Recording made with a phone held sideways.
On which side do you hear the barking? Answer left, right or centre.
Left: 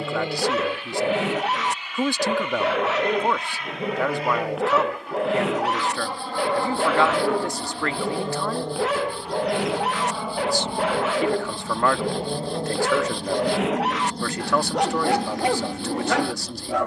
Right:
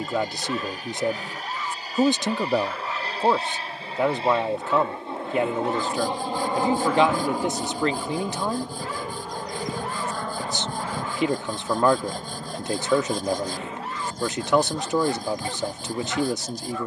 left.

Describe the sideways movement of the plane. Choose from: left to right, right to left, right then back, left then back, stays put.
right to left.